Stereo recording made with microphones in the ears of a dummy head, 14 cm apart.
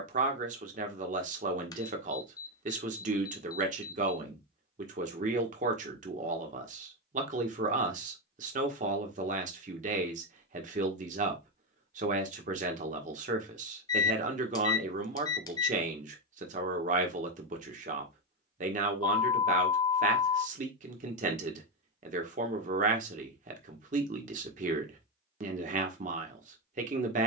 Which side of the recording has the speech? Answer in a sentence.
In this clip you hear the speech on the right.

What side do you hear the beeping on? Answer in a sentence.
In this clip you hear the beeping on the left.